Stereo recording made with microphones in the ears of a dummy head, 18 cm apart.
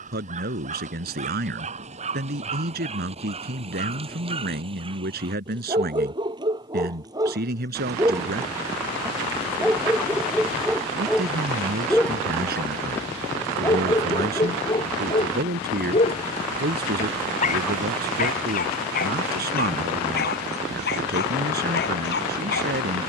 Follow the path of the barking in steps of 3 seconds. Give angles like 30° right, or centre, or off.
40° right, 30° right, 20° right, centre, 20° left, 30° left, 50° left, 60° left.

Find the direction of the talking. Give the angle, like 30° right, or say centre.
50° right.